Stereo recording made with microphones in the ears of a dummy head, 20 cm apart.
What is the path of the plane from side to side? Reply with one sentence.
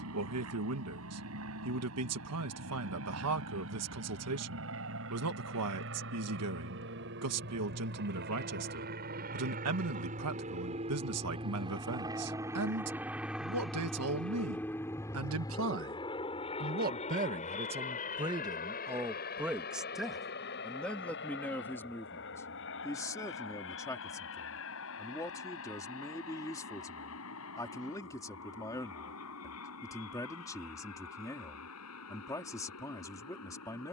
In this clip you hear the plane move from right to left.